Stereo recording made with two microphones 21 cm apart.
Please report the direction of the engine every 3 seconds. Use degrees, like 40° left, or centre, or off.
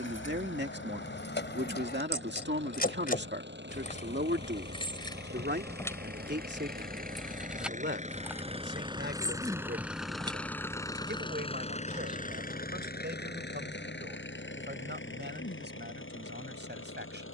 70° right, 60° right, 40° right, 10° left, 50° left, 70° left.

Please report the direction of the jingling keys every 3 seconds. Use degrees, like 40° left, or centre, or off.
60° left, 30° left, centre, 20° right, off, off.